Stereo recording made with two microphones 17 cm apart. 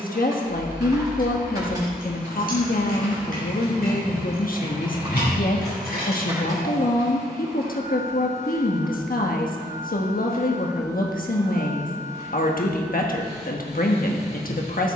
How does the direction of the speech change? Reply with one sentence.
You can hear the speech stay put.